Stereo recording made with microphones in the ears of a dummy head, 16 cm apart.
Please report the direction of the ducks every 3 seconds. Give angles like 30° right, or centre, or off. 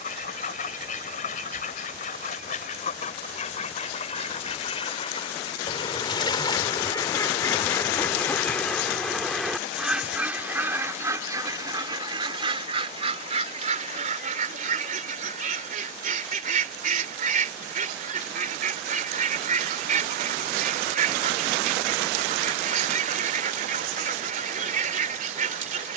50° left, 40° left, 20° left, 10° right, 40° right, 50° right, 50° right, 50° right, 50° right.